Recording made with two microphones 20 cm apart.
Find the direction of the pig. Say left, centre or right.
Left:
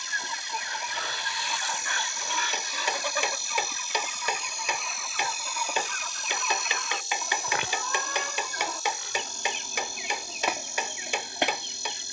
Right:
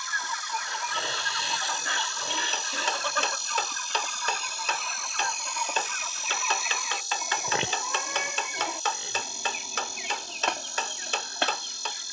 right.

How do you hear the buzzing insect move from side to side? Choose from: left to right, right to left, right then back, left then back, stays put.
right to left.